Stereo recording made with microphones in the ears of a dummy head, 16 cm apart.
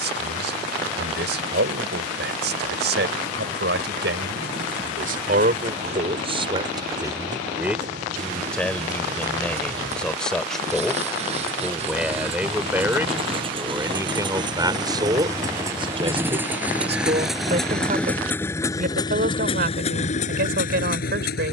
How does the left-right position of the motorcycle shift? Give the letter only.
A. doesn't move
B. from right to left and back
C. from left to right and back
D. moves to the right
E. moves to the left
E.